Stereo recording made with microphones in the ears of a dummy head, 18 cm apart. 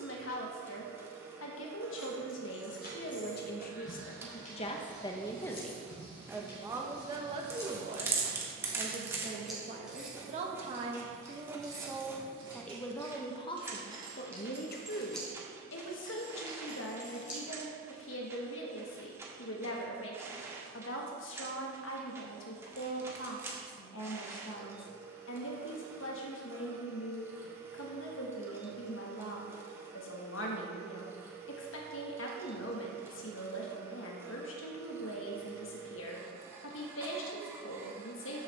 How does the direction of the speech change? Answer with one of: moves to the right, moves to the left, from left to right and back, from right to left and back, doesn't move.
from left to right and back.